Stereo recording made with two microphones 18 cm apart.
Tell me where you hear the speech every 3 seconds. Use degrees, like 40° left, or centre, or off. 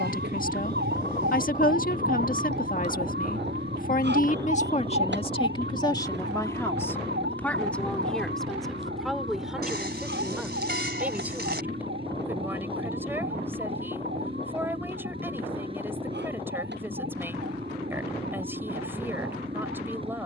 50° left, 40° left, 10° left, 10° right, 10° right, 10° right, 10° right.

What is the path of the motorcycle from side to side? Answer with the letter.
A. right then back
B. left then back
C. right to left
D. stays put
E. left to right
D.